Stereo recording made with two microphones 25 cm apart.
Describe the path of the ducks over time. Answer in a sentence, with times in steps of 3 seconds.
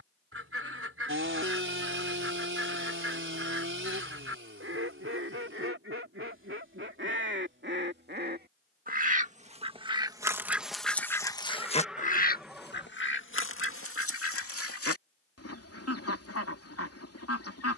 In this clip you hear the ducks on the right from 0 s, in the centre from 9 s and on the left from 12 s.